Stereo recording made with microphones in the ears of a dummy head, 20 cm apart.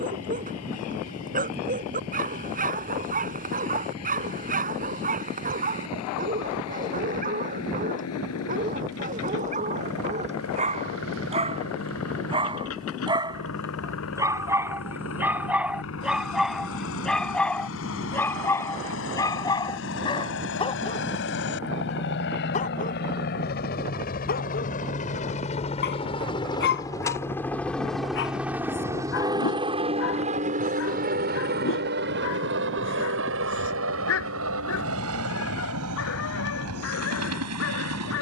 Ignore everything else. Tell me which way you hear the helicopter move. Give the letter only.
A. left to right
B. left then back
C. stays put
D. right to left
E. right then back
A.